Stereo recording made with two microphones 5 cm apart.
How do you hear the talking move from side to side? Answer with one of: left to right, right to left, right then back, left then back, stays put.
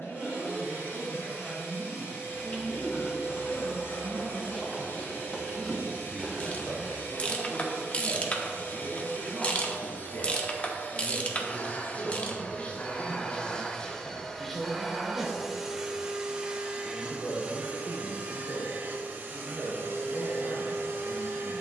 right to left.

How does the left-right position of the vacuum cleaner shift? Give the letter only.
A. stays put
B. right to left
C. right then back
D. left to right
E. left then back
D.